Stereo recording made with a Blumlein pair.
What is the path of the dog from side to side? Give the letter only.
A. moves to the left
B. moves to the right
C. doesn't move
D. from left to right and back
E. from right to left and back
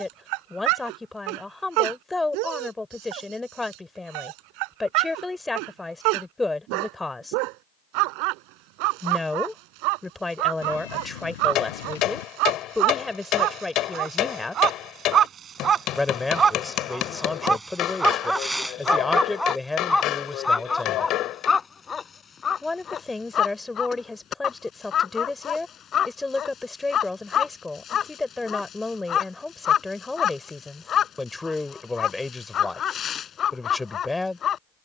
A.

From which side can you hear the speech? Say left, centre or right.
centre.